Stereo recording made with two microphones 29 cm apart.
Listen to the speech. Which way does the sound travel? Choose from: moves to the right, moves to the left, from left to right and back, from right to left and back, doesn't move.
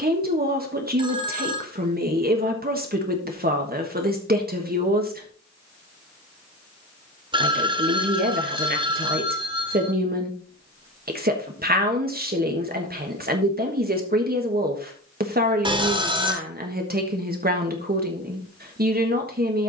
doesn't move.